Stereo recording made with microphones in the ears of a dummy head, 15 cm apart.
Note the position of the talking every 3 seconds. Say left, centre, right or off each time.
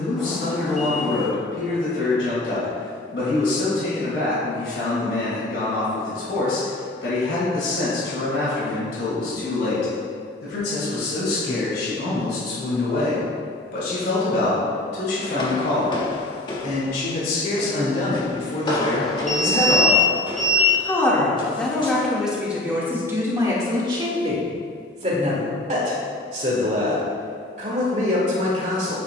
left, left, left, left, left, left, left, centre, right, right.